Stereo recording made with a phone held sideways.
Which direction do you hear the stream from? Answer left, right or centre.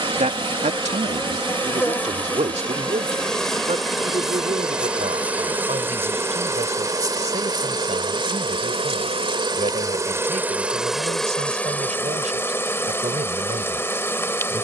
right.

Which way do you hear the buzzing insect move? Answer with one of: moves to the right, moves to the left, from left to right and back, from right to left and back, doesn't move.
from left to right and back.